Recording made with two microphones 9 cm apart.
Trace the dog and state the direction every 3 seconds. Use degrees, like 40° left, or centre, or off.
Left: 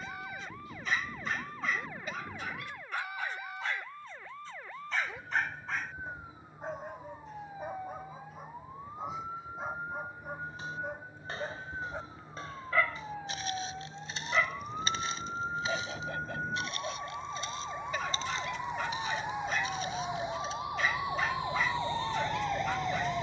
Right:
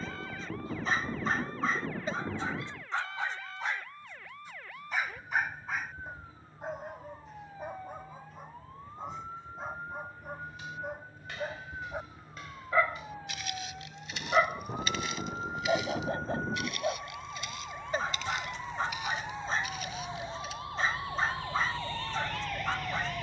30° right, 10° right, centre, centre, 30° right, 30° right, 30° right, 30° right.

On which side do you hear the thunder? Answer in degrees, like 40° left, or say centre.
50° right.